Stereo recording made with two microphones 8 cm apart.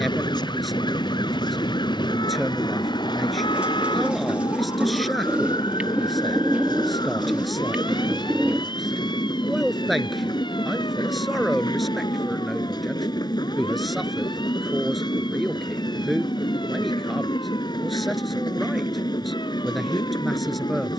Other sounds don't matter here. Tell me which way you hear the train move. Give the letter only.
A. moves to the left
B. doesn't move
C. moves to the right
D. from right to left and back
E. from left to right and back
B.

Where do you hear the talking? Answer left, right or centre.
centre.